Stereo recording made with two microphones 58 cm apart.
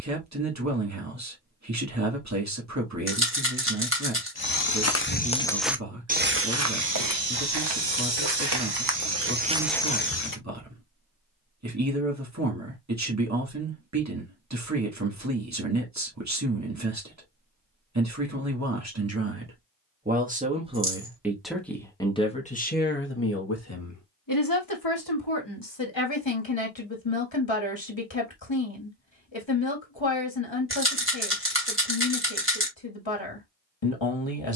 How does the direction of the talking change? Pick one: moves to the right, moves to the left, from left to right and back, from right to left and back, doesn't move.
moves to the left.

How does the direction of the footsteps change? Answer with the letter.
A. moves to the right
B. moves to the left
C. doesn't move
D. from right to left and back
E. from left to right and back
E.